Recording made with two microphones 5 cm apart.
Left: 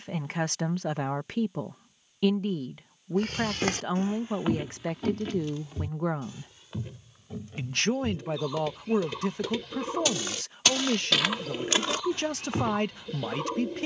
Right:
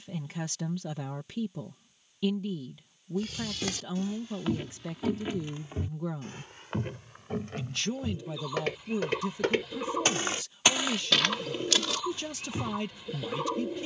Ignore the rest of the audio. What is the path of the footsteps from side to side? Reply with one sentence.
You can hear the footsteps move from left to right and back again.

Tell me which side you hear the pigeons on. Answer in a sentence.
You can hear the pigeons in the centre.